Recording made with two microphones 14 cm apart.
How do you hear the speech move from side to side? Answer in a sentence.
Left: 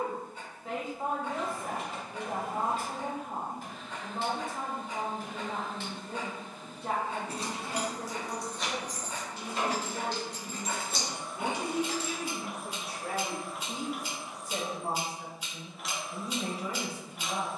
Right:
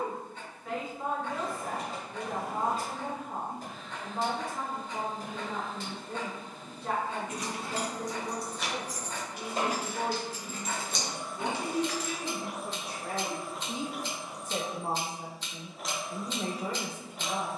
You can hear the speech move to the right.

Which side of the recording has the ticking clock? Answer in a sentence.
You can hear the ticking clock in the centre.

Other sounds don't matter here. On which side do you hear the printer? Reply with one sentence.
In this clip you hear the printer on the right.